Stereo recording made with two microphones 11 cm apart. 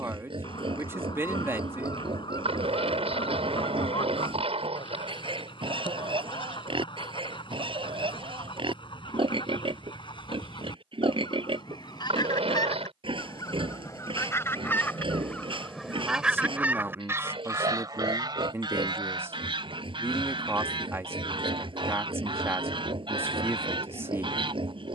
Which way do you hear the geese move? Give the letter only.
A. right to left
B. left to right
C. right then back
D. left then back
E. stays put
B.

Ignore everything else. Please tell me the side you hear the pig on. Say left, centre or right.
right.